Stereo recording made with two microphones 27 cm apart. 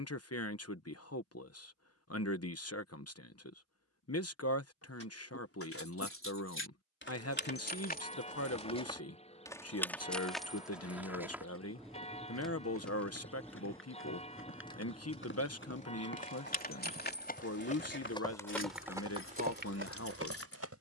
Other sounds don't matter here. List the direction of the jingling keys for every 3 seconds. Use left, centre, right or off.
off, left, left, centre, centre, left, left.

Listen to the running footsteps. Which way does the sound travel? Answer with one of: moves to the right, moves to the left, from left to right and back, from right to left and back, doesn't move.
moves to the right.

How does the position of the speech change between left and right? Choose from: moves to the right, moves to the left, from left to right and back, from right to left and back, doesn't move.
doesn't move.